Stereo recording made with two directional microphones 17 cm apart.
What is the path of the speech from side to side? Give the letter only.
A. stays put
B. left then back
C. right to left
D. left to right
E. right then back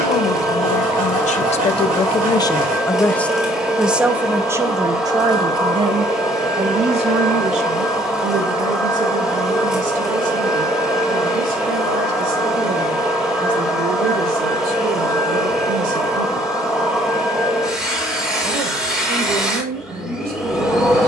D.